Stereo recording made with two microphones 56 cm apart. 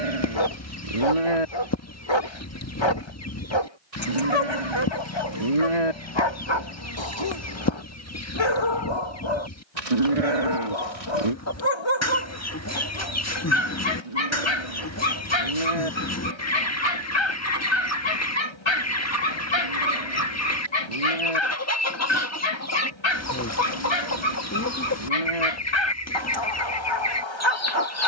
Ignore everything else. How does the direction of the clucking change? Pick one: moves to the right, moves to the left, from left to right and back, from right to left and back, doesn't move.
doesn't move.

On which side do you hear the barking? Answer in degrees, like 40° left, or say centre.
50° left.